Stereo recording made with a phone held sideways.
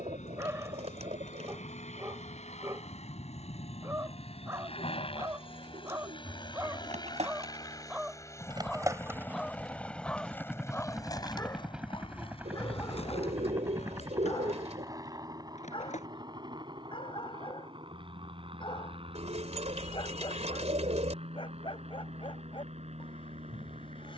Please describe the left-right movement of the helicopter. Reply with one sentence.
In this clip you hear the helicopter move from left to right.